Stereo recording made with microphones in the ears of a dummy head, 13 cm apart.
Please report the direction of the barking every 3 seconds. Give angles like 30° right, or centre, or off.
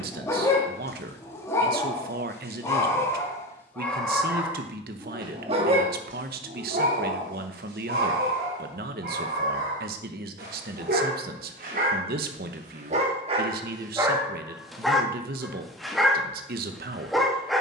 20° left, 10° right, 70° right, 80° right, 30° right, centre.